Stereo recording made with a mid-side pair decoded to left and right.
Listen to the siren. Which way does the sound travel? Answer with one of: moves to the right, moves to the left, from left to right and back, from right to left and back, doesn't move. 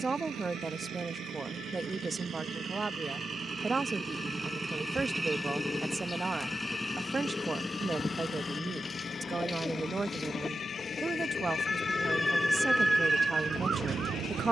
moves to the right.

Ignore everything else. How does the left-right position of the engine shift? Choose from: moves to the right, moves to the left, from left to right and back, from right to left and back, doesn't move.
moves to the left.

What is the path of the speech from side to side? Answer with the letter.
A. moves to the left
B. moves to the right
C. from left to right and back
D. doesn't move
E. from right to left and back
D.